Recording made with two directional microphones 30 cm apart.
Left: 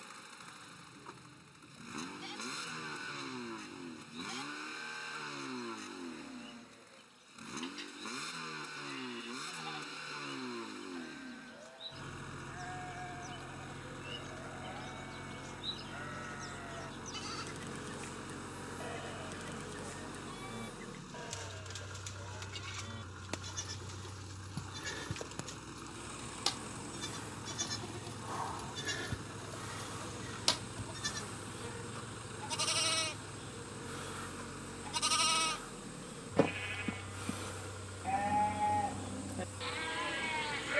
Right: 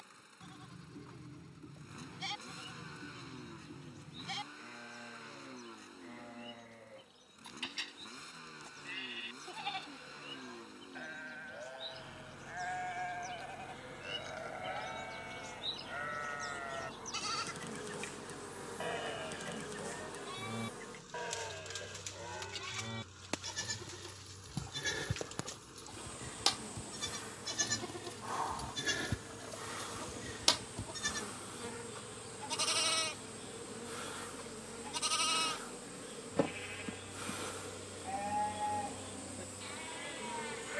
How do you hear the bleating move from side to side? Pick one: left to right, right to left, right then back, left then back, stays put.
right to left.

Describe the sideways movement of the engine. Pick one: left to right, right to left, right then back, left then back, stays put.
stays put.